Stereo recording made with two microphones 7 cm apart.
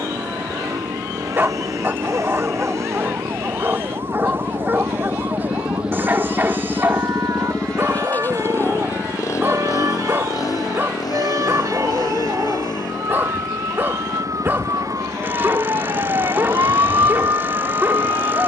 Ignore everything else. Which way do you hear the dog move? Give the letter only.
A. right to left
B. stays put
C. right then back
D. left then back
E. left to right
B.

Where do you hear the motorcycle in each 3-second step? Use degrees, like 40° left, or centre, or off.
50° right, 30° right, 10° left, 50° left, 70° left, 80° left.